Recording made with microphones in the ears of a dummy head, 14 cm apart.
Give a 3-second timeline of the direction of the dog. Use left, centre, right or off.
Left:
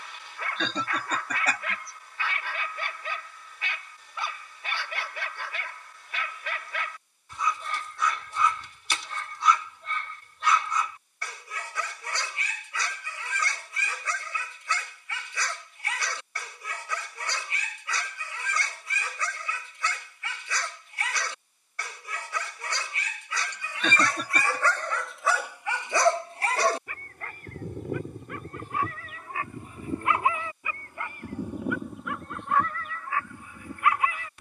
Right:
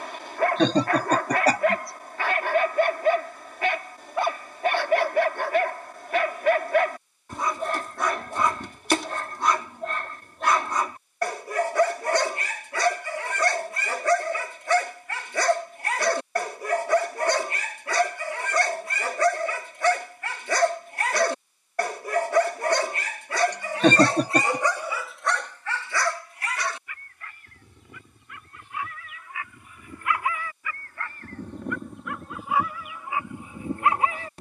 right, right, right, right, right, right, right, right, centre, left, centre, right.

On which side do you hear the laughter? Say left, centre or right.
right.